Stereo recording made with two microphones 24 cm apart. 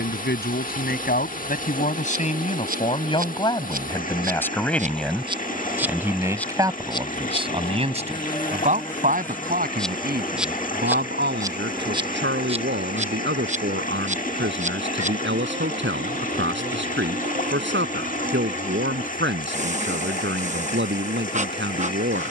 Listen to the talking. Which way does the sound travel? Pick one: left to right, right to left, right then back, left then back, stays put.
left to right.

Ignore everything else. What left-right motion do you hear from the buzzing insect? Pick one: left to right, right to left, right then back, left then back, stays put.
left then back.